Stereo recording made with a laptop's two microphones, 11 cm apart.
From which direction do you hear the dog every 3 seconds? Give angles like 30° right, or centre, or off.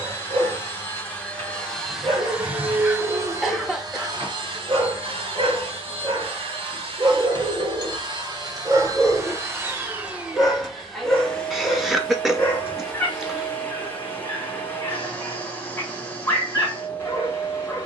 70° right, 70° right, 40° right, centre, 20° left, 20° left.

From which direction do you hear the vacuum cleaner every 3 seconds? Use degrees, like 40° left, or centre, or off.
10° left, 50° right, 50° right, 10° right, 20° left, 20° left.